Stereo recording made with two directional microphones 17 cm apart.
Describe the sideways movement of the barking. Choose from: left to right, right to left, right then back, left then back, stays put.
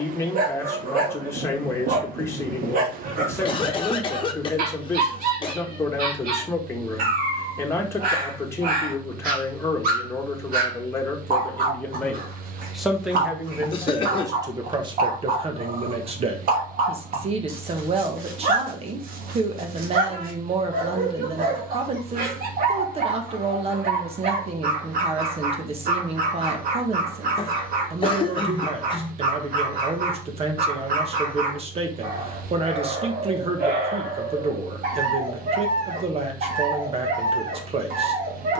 stays put.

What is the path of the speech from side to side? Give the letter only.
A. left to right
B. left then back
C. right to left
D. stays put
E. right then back
A.